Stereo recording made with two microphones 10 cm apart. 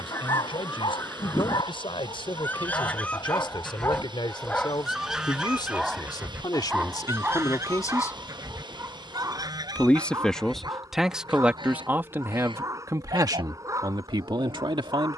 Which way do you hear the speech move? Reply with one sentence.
In this clip you hear the speech travel towards the right.